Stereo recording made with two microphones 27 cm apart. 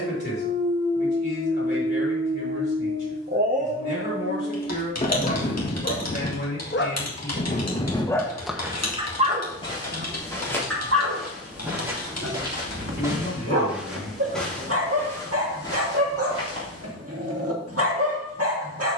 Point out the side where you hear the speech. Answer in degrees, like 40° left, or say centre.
40° left.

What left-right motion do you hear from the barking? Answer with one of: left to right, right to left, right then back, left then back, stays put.
left then back.